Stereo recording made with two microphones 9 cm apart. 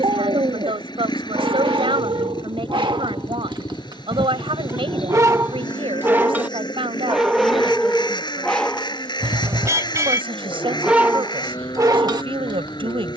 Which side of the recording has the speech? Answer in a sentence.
In this clip you hear the speech on the right.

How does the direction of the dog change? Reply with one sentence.
In this clip you hear the dog move from right to left and back again.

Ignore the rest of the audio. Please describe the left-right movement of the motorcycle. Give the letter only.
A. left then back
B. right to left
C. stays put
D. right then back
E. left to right
C.